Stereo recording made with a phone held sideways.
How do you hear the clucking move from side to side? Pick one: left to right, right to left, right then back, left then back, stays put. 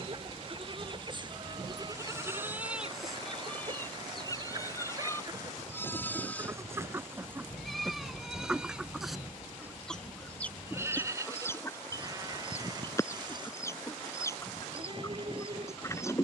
right to left.